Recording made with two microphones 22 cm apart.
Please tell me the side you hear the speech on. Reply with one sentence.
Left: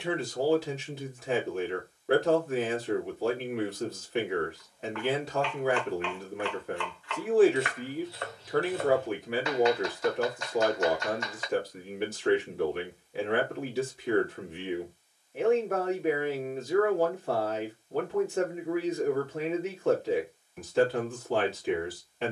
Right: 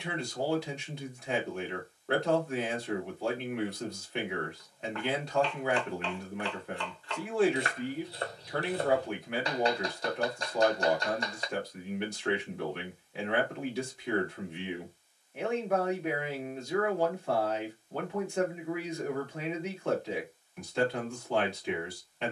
You can hear the speech in the centre.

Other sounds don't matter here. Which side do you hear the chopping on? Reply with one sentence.
You can hear the chopping on the right.